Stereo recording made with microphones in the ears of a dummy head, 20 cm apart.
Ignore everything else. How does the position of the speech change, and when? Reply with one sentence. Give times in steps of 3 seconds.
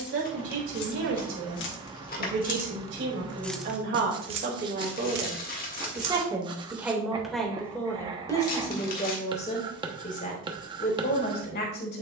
You can hear the speech on the right from 0 s, in the centre from 6 s and on the left from 9 s.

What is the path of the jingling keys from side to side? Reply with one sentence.
In this clip you hear the jingling keys go from the left side to the right.